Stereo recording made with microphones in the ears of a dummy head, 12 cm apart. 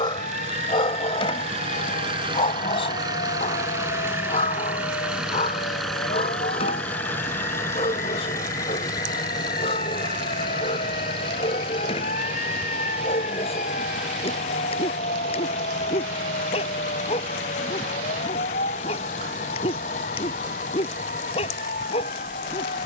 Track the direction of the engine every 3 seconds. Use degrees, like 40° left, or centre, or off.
40° right, 10° right, 20° left, 30° left, 50° left, 50° left, 60° left, 60° left.